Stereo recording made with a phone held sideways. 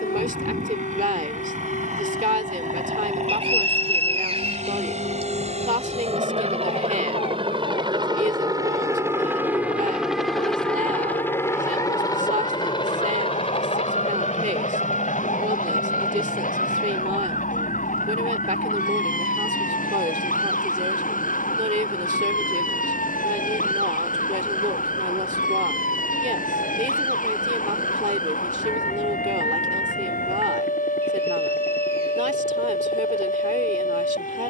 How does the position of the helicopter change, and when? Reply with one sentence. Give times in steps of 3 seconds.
You can hear the helicopter on the right from 0 s, in the centre from 9 s and on the left from 12 s.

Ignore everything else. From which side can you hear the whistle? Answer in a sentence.
You can hear the whistle on the right.